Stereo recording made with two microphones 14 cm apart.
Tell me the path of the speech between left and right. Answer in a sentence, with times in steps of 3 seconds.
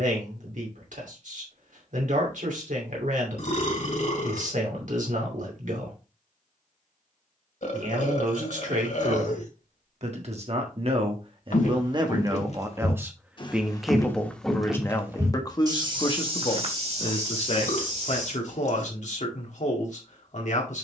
You can hear the speech on the right from 0 s, in the centre from 12 s and on the left from 15 s.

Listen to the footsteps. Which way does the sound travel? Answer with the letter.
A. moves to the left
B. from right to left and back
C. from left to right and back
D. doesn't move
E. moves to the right
E.